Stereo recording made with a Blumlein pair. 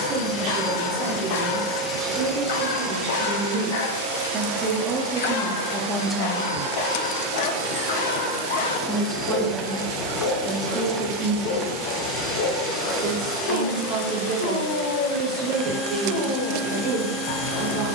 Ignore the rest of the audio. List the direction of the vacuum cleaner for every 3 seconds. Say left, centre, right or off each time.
centre, right, right, centre, centre, centre.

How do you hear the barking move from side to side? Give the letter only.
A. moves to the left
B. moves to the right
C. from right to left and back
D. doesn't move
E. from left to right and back
D.